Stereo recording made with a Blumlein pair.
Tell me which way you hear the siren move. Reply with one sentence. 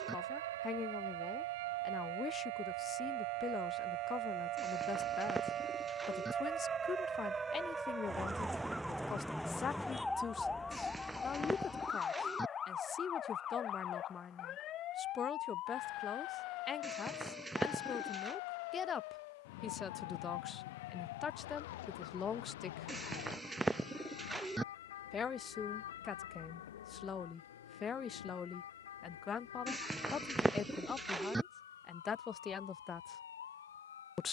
You can hear the siren move to the left.